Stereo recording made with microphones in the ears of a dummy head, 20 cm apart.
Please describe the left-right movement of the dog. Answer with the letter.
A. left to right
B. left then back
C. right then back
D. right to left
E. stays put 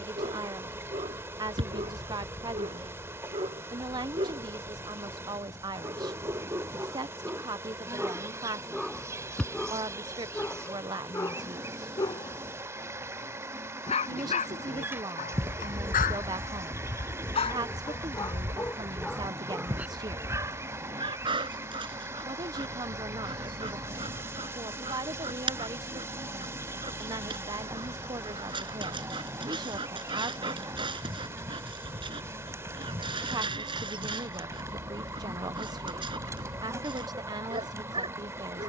B.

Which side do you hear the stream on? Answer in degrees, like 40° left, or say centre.
10° right.